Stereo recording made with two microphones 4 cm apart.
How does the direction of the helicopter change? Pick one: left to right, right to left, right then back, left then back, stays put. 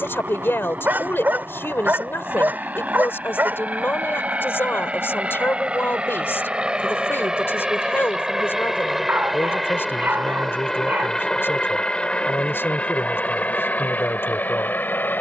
right to left.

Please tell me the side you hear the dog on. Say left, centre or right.
right.